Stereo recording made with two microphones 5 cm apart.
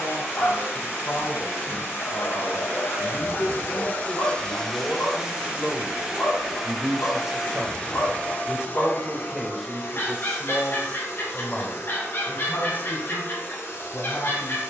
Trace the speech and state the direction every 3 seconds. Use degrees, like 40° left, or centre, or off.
60° left, 30° left, 10° right, 10° left, 50° left.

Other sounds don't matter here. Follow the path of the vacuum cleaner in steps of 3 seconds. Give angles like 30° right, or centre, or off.
70° left, 10° left, 10° left, 60° left, 70° left.